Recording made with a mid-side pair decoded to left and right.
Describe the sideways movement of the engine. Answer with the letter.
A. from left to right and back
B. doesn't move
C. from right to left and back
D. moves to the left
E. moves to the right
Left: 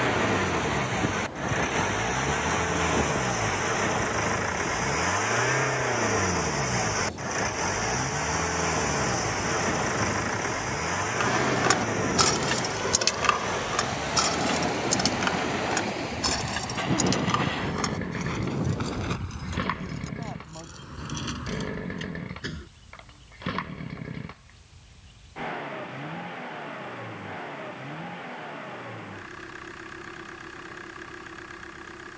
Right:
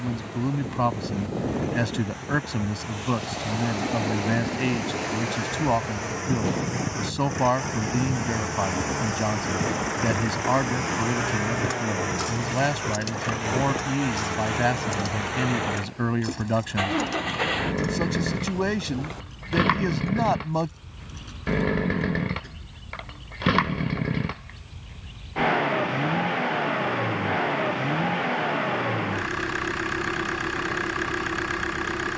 E.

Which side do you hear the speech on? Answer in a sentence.
You can hear the speech on the right.